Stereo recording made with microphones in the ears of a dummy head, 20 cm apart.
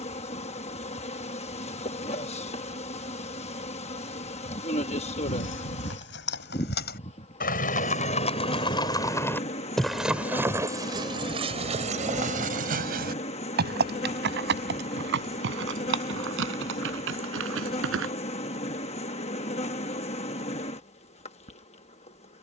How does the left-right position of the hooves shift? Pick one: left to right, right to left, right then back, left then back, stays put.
left to right.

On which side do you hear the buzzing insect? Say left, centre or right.
left.